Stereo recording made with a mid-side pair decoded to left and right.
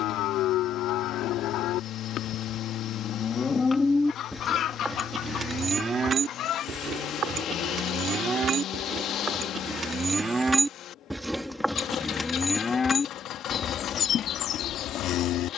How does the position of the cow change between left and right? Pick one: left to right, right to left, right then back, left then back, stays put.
right then back.